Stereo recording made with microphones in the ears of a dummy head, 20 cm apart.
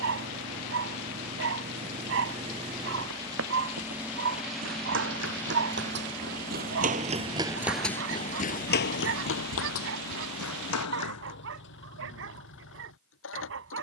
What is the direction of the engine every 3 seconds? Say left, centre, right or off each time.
right, centre, left, left, left.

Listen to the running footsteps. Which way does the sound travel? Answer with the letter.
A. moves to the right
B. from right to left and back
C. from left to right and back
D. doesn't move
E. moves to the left
E.